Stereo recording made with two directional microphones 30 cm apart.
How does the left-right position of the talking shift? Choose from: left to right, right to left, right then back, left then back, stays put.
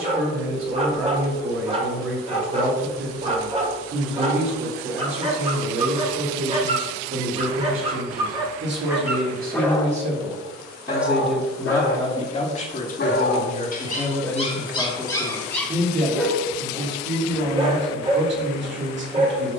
left then back.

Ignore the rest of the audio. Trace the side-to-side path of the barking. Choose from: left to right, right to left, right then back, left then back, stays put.
left then back.